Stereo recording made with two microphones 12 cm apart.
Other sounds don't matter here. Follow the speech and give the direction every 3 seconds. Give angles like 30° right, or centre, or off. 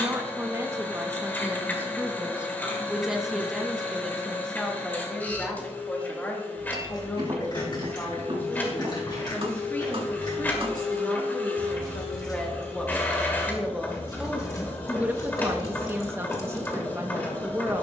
20° right, 10° left, 20° left, 20° left, centre, 20° right.